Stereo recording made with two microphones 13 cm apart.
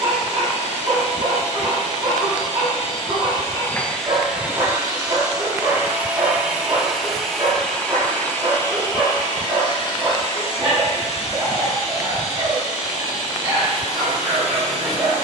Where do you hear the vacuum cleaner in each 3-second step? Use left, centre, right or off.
left, centre, centre, left, left.